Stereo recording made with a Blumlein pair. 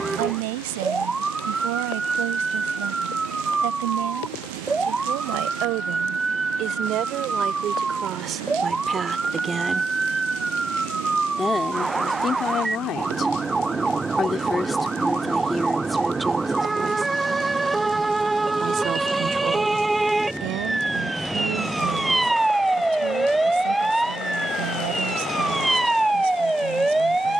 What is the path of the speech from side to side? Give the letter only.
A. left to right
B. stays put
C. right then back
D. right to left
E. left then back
E.